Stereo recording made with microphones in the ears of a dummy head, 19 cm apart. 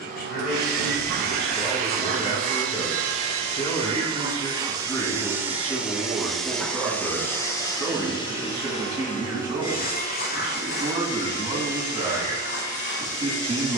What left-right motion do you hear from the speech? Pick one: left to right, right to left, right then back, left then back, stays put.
left to right.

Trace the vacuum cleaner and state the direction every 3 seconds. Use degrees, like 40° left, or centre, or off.
40° right, 20° right, 10° left, 40° left, 50° left.